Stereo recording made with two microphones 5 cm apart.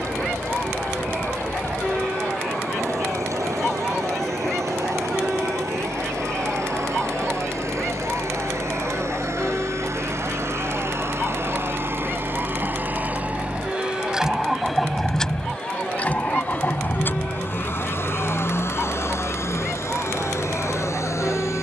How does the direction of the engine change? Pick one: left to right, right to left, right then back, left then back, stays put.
right to left.